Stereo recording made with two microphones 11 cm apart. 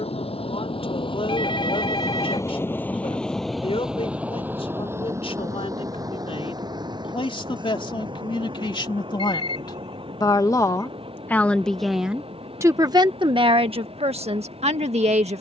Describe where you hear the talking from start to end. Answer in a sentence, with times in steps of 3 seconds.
In this clip you hear the talking on the left from 0 s and on the right from 12 s.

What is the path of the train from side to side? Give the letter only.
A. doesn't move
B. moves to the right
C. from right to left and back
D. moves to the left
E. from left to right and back
B.